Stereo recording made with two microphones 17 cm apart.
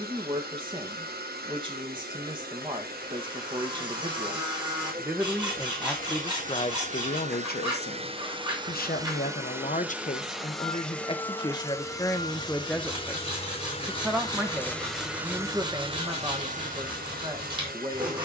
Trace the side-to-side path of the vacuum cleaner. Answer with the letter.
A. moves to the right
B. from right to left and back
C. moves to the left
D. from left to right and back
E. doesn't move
B.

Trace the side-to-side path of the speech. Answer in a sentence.
You can hear the speech go left and come back.